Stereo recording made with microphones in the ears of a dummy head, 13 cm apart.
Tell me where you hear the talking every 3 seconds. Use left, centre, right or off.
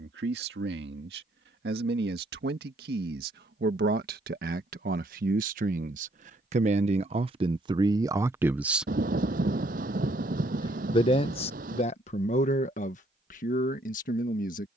right, right, right, left, left.